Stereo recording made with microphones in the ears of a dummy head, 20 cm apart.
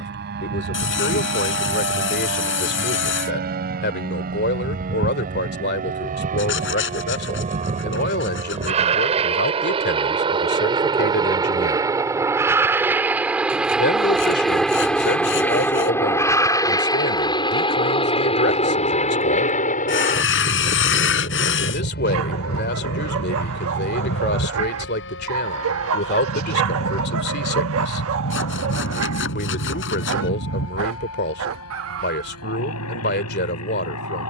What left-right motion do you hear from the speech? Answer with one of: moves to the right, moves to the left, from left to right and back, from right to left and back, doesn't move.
doesn't move.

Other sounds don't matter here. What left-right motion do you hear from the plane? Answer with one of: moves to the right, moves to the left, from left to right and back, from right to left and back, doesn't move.
moves to the left.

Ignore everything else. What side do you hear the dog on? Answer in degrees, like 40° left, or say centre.
60° right.